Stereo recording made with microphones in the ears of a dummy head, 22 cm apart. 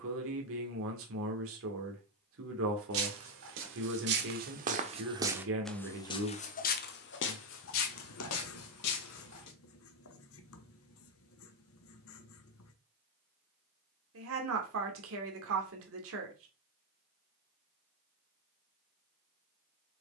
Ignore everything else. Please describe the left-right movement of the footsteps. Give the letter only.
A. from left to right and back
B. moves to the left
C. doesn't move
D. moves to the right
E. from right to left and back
B.